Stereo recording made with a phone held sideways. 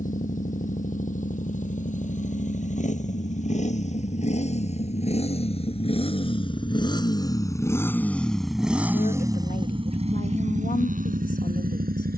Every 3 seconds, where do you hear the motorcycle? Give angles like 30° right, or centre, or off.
60° left, 50° left, 20° left, 50° right.